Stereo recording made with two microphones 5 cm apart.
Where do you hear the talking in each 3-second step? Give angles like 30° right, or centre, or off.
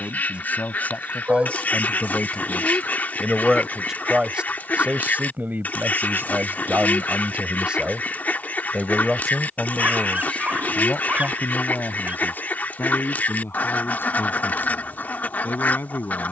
20° left, 30° right, 30° right, 20° left, 40° left, 40° left.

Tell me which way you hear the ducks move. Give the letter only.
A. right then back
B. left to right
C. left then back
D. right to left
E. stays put
E.